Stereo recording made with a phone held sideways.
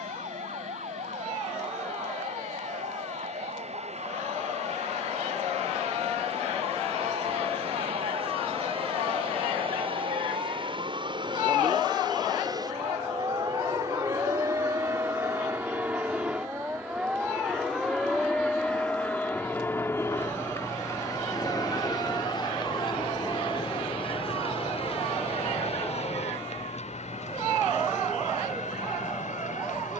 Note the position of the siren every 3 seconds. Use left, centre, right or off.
right, right, right, right, right, centre, centre, left, left, left.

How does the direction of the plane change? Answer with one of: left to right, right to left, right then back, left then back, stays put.
right to left.